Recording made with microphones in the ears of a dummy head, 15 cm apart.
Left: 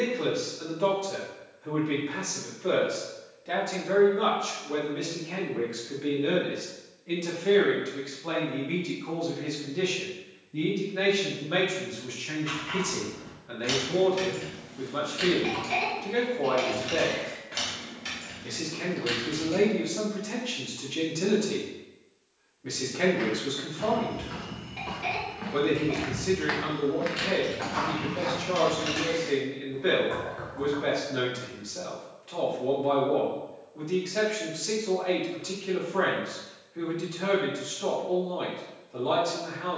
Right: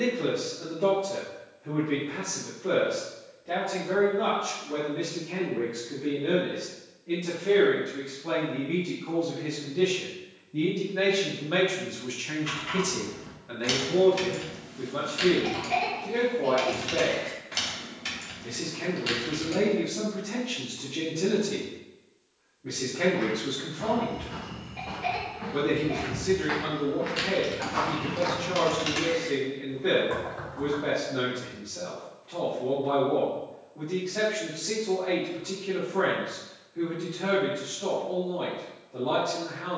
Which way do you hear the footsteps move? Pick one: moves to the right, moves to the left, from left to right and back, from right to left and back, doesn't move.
moves to the right.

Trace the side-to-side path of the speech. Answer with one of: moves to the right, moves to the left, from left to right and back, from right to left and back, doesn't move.
from left to right and back.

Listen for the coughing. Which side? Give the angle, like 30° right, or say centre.
30° left.